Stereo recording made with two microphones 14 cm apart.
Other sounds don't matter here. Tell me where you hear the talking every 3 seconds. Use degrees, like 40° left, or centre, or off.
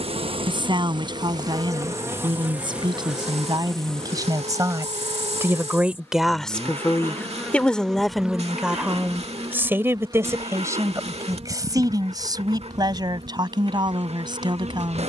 30° right, 20° right, centre, 20° right, 30° right.